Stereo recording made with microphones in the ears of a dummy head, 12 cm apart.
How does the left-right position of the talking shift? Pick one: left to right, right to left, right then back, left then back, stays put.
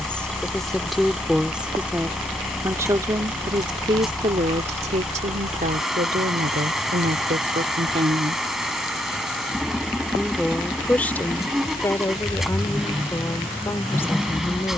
right then back.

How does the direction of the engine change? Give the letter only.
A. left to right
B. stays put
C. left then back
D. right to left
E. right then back
B.